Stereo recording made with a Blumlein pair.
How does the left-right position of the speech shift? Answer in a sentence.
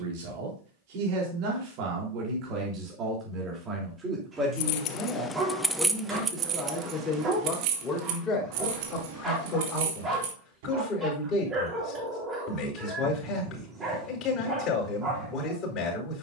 In this clip you hear the speech go from the right side to the left.